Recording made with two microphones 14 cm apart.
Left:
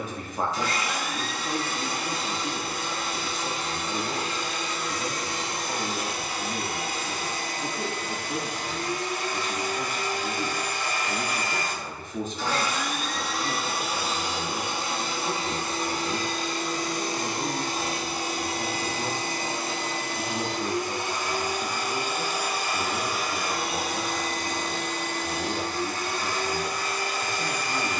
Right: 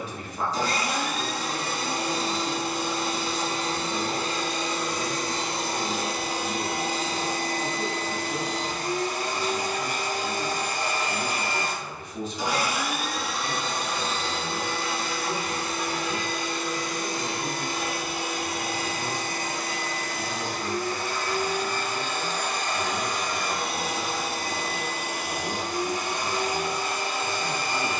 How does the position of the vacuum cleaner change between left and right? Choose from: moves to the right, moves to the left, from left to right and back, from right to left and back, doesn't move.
from right to left and back.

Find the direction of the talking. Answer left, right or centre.
left.